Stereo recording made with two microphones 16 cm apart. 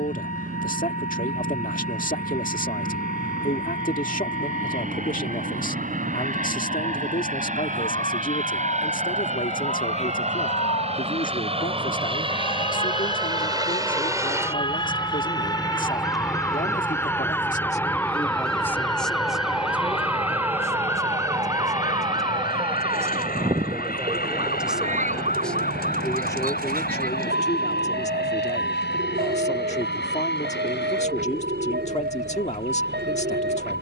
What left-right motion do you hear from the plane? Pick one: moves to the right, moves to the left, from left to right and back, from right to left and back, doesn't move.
moves to the left.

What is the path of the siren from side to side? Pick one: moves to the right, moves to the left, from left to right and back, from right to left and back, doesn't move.
moves to the right.